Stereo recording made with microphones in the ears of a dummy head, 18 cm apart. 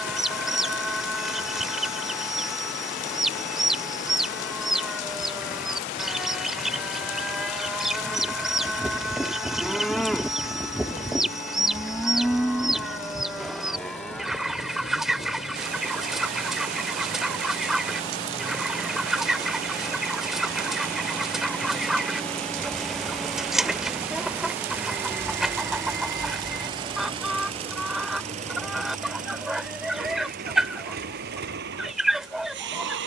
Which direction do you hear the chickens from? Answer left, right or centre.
centre.